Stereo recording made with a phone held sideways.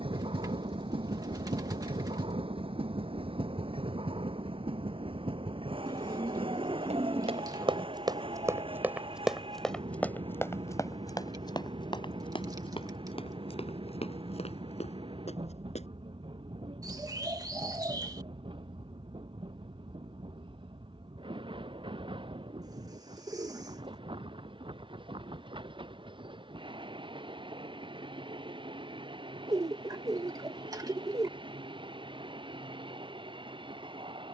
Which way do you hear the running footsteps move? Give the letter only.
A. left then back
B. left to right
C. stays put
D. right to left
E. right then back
D.